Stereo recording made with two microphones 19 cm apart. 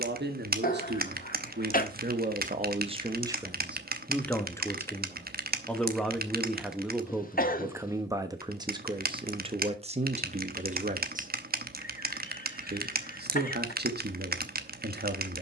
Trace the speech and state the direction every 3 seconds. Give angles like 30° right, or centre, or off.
50° right, centre, 10° right, 40° right, 60° right.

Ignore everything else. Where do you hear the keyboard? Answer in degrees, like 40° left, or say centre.
50° right.